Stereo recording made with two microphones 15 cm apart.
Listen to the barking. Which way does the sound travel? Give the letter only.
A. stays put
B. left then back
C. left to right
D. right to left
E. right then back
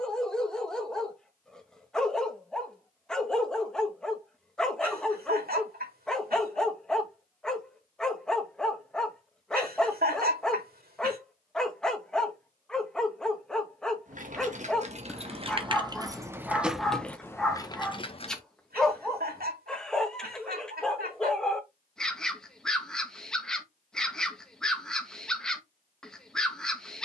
A.